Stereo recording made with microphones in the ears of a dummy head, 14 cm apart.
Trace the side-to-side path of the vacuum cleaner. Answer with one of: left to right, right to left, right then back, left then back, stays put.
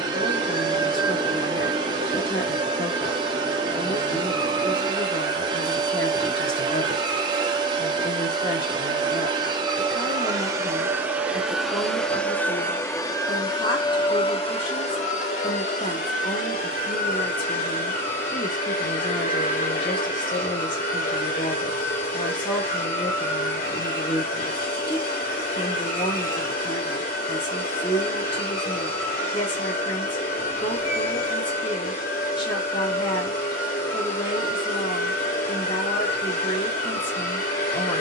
right to left.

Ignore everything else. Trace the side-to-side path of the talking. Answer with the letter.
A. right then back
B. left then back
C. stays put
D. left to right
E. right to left
C.